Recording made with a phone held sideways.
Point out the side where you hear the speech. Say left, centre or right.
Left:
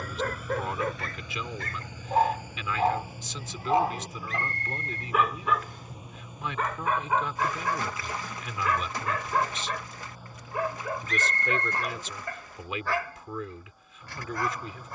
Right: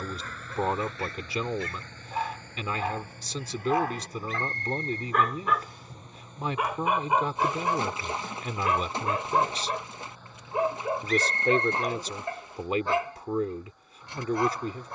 right.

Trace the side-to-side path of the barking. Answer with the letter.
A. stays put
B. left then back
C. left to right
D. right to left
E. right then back
C.